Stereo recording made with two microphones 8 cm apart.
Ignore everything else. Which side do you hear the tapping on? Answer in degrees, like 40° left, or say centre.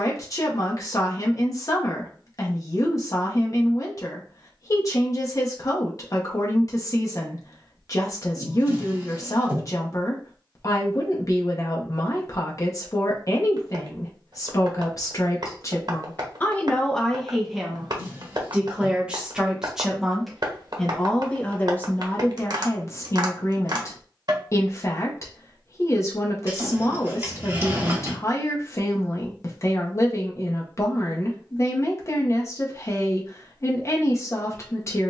50° right.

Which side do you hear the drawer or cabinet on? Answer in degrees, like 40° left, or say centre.
30° right.